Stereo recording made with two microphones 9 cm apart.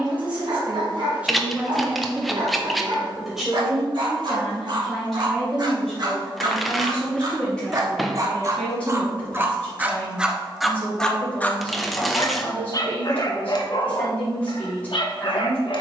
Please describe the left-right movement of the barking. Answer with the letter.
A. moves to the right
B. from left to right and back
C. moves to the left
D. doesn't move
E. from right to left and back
C.